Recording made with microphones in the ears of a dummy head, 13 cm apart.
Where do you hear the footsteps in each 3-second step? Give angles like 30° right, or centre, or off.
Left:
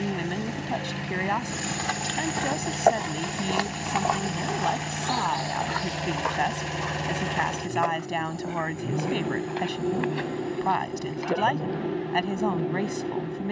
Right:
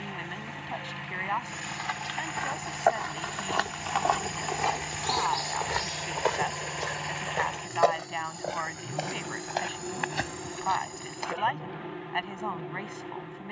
50° left, centre, 40° right, 50° right, off.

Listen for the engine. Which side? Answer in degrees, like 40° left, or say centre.
50° left.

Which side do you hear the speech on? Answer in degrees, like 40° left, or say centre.
50° left.